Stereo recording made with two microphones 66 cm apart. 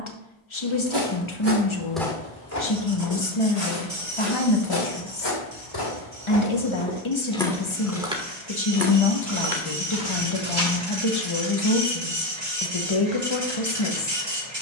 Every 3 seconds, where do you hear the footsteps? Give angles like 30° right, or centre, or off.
10° right, 40° left, 10° left, 40° right, off.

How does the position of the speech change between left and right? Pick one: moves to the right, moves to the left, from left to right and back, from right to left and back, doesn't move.
doesn't move.